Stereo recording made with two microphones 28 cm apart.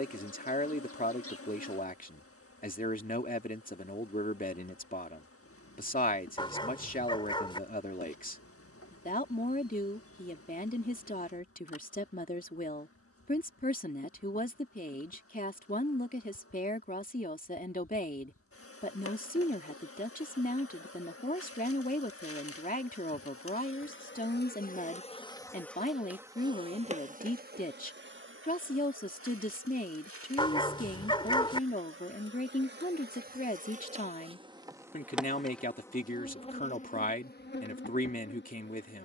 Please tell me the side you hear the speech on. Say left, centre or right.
left.